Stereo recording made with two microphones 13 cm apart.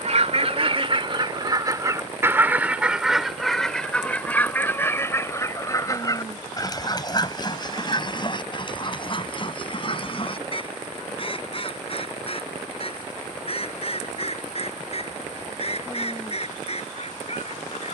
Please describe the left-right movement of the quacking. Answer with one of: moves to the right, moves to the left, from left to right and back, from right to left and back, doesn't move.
moves to the left.